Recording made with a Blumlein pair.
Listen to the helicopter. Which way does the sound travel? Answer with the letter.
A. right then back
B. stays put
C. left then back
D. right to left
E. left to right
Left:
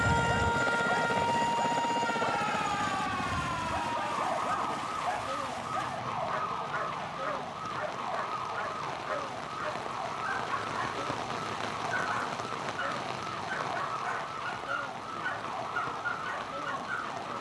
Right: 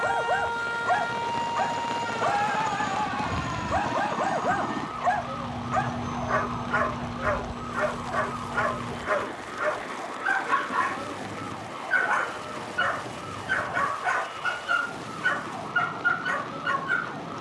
E.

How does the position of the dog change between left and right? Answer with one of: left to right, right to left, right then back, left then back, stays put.
stays put.